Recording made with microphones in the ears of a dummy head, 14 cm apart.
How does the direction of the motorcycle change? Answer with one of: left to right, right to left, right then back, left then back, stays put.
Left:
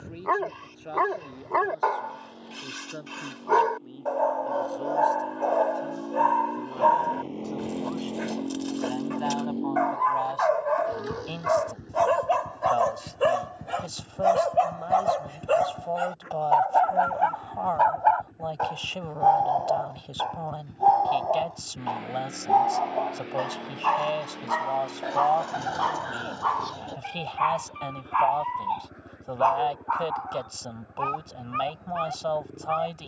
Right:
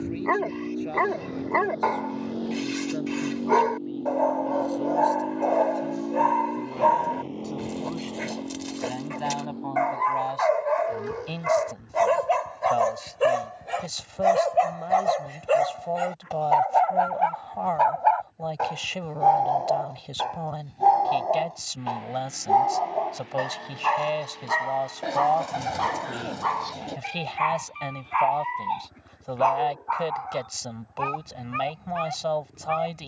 right to left.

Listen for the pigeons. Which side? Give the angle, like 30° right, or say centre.
20° right.